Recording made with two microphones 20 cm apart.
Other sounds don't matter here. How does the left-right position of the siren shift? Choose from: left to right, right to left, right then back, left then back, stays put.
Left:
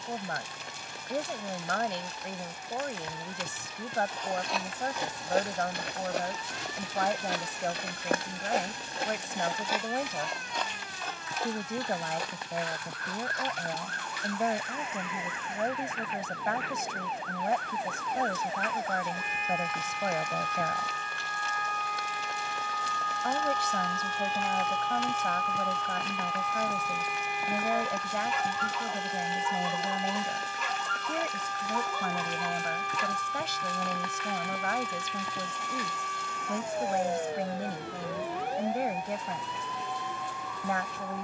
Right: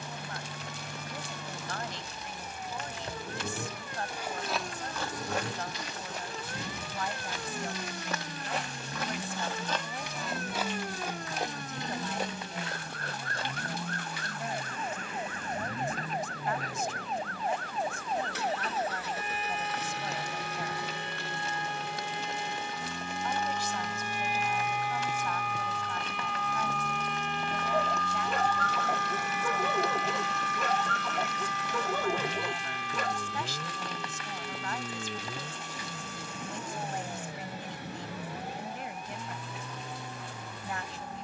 right to left.